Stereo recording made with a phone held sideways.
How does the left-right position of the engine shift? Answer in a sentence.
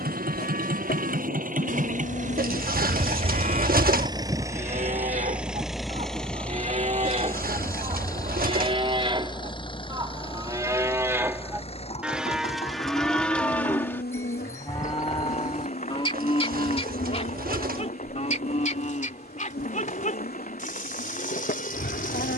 In this clip you hear the engine travel towards the left.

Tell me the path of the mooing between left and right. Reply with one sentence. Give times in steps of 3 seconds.
In this clip you hear the mooing on the right from 0 s, in the centre from 12 s and on the left from 15 s.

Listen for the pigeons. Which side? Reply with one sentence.
You can hear the pigeons on the right.